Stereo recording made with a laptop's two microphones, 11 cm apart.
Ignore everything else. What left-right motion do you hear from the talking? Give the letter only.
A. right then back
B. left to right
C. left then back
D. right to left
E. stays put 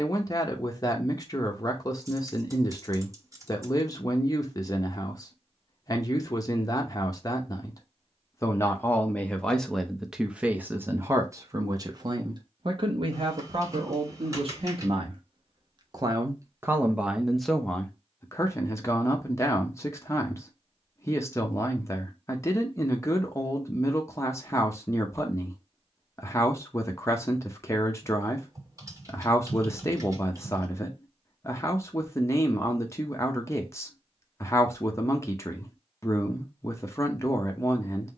A.